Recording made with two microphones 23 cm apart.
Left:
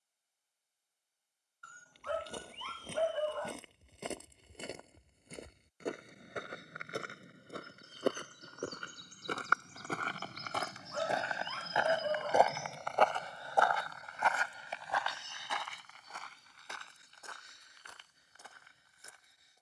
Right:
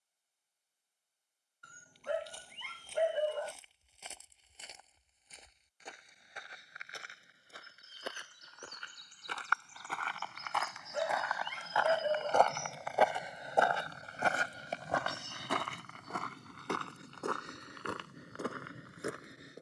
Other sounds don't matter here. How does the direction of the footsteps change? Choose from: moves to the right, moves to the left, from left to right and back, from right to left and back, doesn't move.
moves to the right.